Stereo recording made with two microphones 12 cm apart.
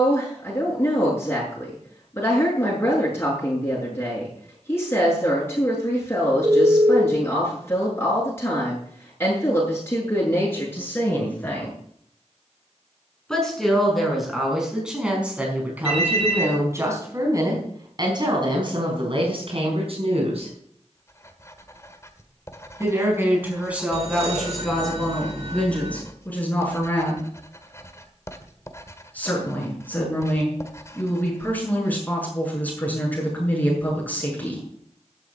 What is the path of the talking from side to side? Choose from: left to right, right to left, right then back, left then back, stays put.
right then back.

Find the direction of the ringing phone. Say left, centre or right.
right.